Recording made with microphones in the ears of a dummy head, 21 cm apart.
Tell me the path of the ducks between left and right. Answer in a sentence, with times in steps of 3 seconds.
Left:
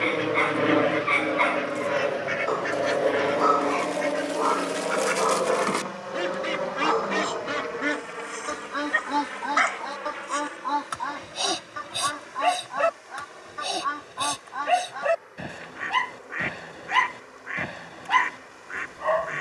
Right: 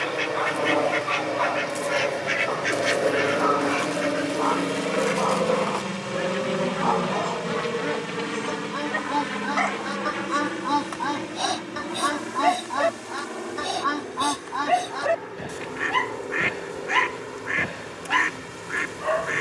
In this clip you hear the ducks on the right from 0 s, in the centre from 3 s, on the left from 6 s and on the right from 9 s.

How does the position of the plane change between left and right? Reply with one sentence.
You can hear the plane move from left to right.